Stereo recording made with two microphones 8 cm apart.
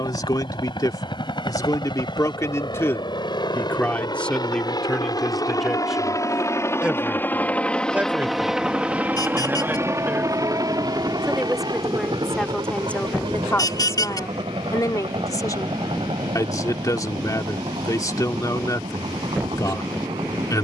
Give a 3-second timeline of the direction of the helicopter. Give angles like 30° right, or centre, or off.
70° left, 60° left, 20° left, 40° right, 60° right, 70° right, 80° right.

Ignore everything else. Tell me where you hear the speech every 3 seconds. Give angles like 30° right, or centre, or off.
40° left, 10° left, 20° right, 20° right, 20° left, 40° left, 40° left.